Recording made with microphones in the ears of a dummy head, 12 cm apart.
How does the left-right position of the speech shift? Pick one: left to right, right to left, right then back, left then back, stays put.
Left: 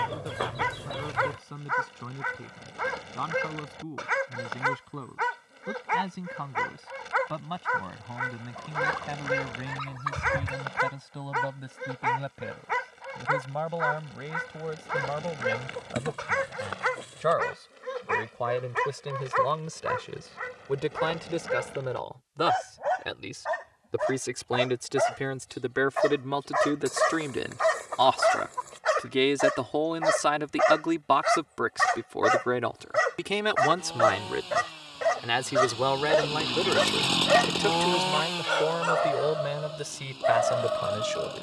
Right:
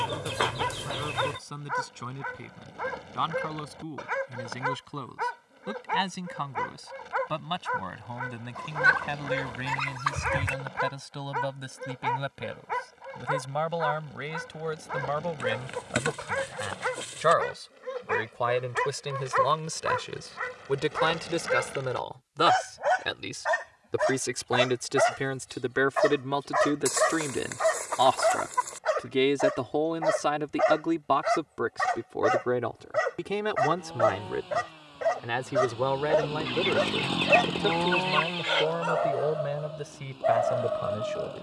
right to left.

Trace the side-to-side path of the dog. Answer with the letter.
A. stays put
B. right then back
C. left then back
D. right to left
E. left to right
B.